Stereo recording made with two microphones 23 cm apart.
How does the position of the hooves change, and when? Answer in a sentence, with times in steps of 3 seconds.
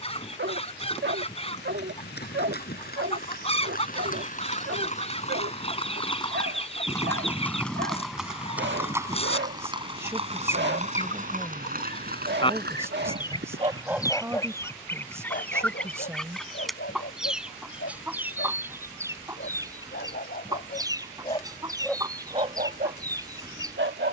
In this clip you hear the hooves on the left from 0 s, in the centre from 6 s, on the right from 9 s and not at all from 15 s.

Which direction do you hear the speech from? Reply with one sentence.
In this clip you hear the speech in the centre.